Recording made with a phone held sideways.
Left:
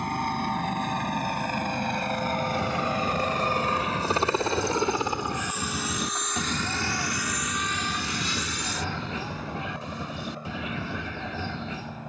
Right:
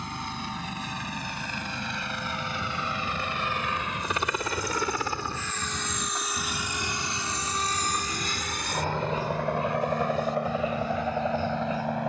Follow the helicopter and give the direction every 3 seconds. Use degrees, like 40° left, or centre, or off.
50° left, 30° left, 30° right, 70° right.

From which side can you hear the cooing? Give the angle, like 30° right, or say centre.
80° left.